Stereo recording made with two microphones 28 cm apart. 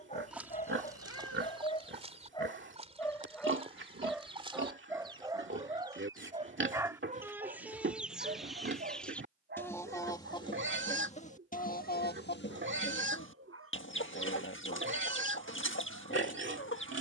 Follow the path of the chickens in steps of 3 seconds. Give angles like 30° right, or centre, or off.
20° right, 20° right, 10° right, 20° left, 40° left, 40° left.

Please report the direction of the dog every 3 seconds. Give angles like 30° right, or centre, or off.
20° left, 10° right, 30° right, 40° right, 50° right, 50° right.